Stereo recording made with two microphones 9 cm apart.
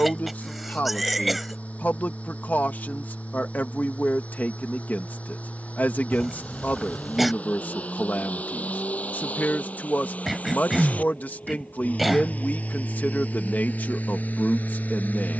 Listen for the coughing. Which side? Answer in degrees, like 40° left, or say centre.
centre.